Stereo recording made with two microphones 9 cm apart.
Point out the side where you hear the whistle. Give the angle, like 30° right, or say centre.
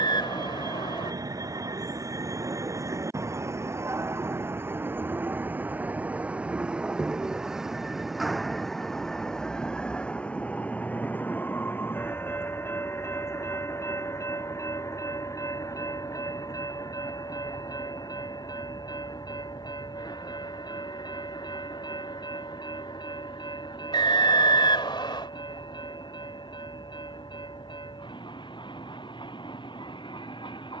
70° left.